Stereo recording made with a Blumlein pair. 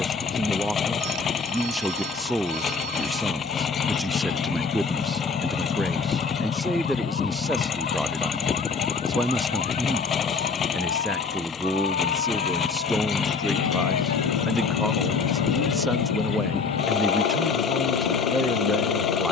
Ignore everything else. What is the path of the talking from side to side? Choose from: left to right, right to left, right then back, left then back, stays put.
stays put.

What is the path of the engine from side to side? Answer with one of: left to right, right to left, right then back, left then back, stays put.
stays put.